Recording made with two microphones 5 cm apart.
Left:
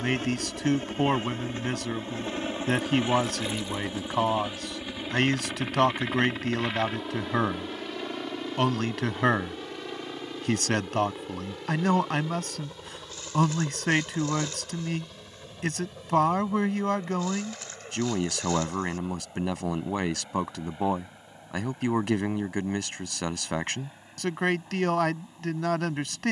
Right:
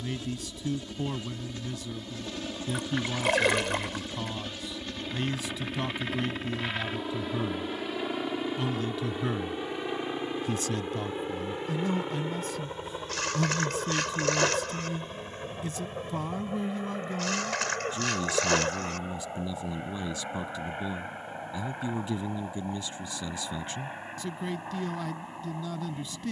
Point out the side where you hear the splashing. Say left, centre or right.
right.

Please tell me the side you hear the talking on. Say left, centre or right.
left.